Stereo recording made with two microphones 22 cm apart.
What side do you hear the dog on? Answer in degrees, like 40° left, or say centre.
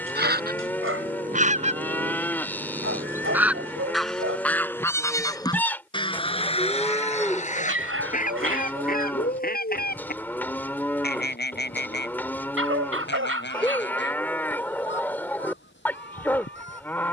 80° right.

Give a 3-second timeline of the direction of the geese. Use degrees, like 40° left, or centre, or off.
30° right, centre, 30° left, 50° left, 50° left, 60° left.